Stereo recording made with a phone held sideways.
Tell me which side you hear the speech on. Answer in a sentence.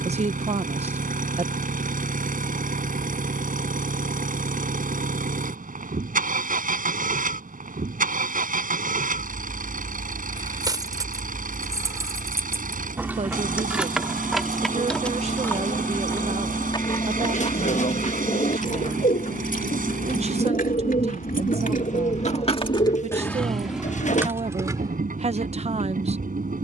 You can hear the speech on the right.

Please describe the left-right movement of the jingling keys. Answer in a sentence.
You can hear the jingling keys move from right to left and back again.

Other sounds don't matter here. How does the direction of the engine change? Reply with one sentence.
You can hear the engine stay put.